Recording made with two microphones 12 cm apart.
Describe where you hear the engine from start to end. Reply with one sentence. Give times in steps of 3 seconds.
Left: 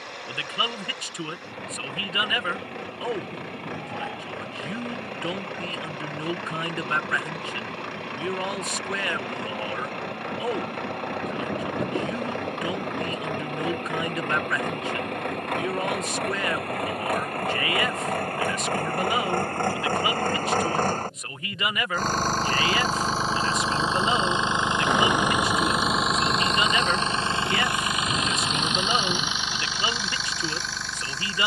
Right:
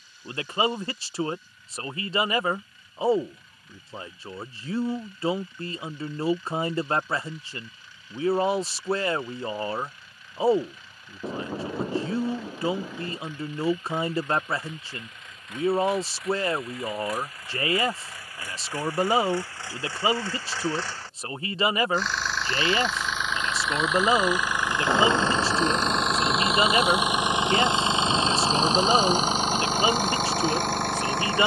In this clip you hear the engine on the left from 0 s, in the centre from 24 s and on the right from 27 s.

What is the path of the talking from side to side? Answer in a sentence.
You can hear the talking stay put.